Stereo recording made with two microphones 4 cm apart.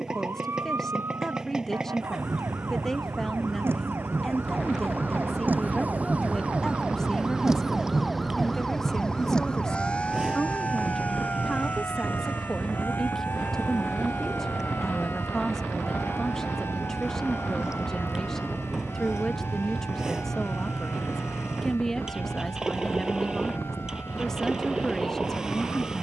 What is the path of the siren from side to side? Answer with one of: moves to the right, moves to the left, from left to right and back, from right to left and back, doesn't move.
moves to the left.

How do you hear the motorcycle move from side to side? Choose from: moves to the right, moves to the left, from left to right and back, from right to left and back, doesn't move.
doesn't move.